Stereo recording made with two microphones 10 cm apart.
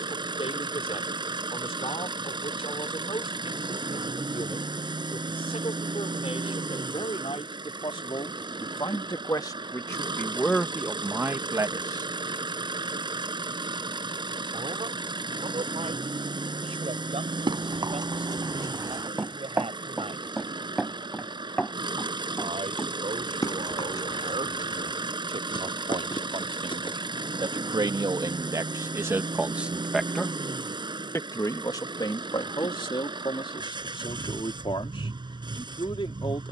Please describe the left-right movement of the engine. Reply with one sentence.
You can hear the engine stay put.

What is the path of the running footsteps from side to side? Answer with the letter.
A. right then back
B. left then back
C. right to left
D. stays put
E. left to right
C.